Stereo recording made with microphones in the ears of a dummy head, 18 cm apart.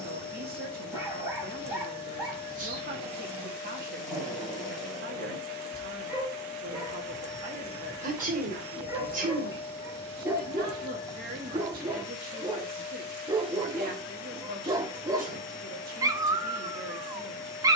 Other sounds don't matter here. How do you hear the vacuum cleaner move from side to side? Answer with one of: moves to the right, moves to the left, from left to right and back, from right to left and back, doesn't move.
doesn't move.